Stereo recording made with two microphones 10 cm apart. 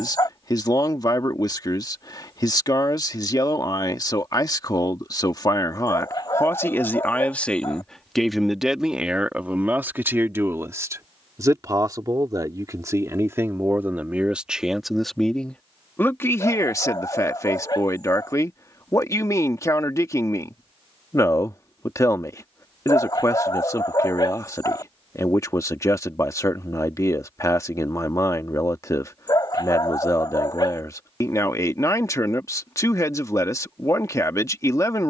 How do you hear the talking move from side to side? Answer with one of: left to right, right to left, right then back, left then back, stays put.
right then back.